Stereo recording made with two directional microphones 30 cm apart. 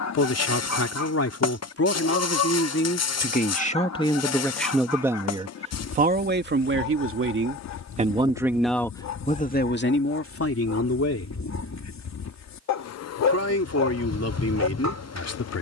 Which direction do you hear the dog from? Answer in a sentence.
In this clip you hear the dog on the left.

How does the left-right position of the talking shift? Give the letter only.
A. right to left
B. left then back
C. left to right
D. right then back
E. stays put
D.